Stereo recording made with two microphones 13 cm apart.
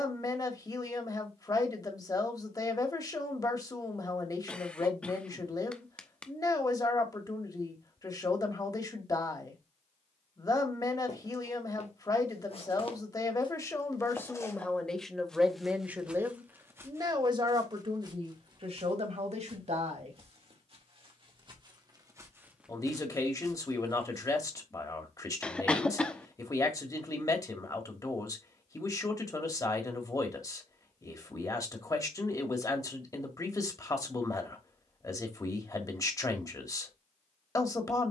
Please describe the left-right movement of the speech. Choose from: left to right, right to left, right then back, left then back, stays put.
right then back.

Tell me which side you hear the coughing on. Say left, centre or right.
centre.